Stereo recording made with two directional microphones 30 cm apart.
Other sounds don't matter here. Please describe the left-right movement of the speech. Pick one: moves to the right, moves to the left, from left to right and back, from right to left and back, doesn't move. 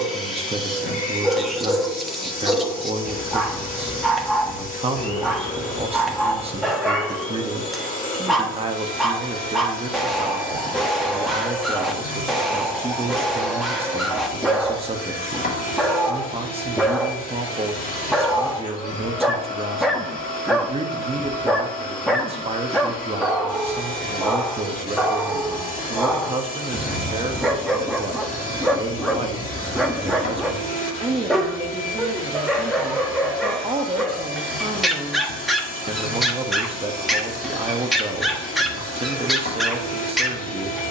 doesn't move.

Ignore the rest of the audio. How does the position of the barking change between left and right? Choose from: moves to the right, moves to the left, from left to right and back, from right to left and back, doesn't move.
doesn't move.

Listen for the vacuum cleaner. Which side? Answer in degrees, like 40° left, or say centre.
30° left.